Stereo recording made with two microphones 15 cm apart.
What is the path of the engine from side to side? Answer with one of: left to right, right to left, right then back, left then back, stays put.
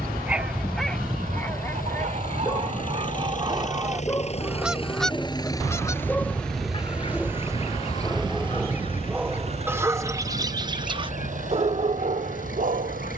left to right.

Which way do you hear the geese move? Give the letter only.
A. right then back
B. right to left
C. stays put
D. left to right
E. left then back
B.